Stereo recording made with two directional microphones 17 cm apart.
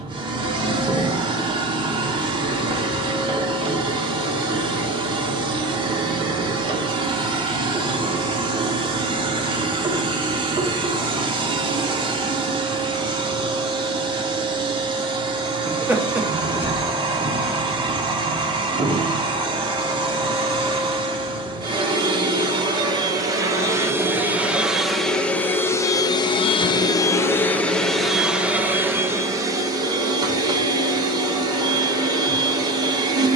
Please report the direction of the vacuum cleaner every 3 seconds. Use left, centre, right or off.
right, right, right, right, right, right, right, right, centre, centre, right.